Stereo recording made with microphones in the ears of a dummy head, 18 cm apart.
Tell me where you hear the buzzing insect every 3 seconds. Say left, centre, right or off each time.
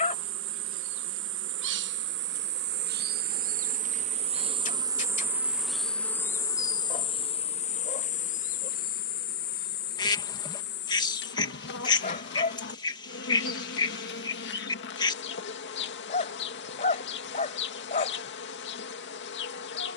right, right, left, left, left, left, left.